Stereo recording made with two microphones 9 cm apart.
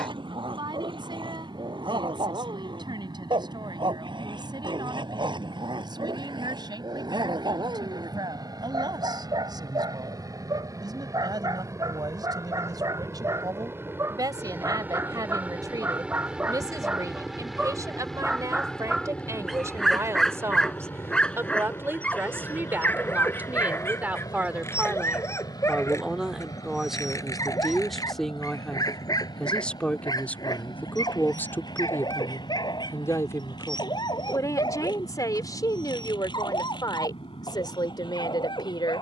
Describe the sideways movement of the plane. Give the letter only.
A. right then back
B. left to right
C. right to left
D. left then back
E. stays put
C.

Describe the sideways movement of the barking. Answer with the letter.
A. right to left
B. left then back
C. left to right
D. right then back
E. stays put
A.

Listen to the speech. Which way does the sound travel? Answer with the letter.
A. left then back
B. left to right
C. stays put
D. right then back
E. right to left
E.